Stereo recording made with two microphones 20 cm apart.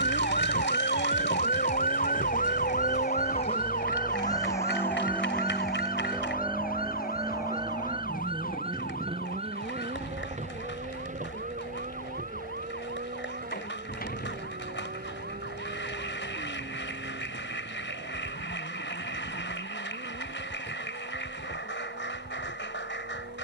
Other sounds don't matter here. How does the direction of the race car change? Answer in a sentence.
You can hear the race car move to the right.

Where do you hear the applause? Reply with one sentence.
You can hear the applause on the left.